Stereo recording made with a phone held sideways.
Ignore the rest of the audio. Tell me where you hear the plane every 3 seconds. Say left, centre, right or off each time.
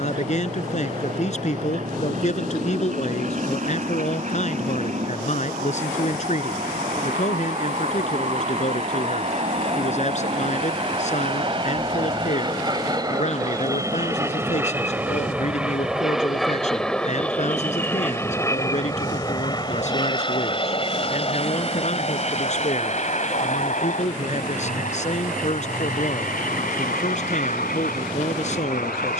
right, right, right, right, right, centre, left, left, left, left.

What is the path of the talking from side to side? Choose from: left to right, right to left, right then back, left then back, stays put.
stays put.